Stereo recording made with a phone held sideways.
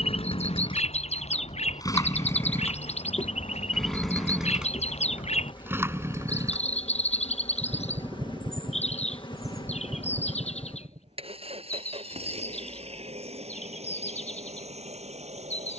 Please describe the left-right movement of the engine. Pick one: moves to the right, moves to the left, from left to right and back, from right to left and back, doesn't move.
moves to the right.